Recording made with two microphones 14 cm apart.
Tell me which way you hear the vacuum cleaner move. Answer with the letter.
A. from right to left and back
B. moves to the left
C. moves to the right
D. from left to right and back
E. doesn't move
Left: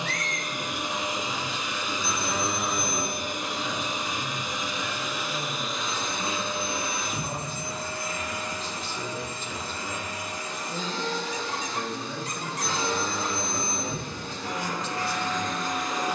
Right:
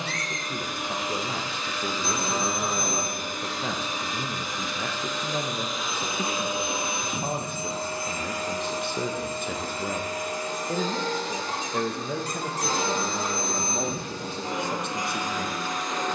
D.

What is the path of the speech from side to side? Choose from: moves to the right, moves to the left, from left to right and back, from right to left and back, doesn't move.
doesn't move.